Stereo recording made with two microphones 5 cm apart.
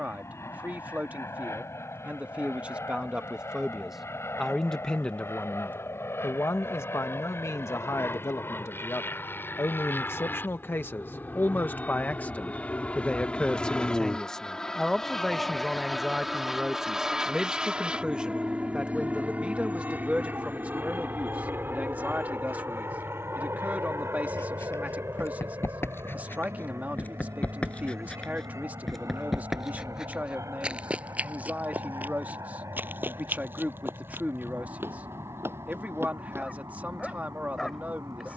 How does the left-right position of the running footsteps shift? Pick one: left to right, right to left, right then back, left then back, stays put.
left to right.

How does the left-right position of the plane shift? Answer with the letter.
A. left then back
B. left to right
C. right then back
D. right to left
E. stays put
B.